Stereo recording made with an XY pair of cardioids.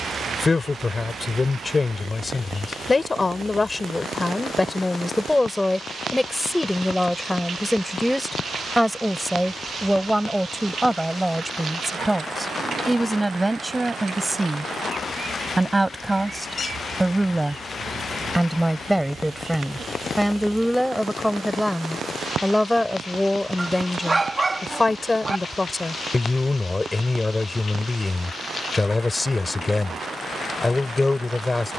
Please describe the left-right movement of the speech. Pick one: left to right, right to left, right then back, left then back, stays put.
right then back.